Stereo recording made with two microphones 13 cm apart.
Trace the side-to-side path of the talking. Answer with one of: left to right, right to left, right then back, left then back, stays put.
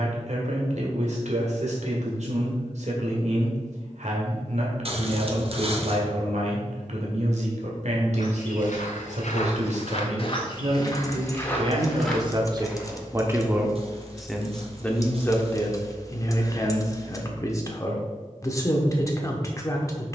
right to left.